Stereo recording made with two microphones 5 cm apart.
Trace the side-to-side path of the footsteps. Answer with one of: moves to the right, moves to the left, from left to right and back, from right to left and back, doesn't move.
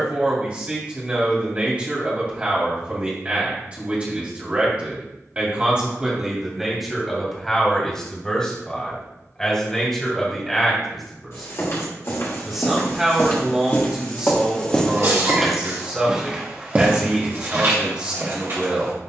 moves to the right.